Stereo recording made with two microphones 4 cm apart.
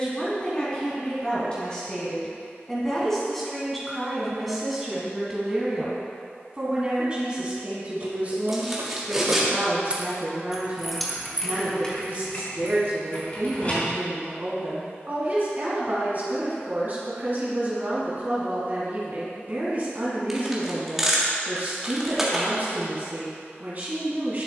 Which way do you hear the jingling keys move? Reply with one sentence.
In this clip you hear the jingling keys go from the right side to the left.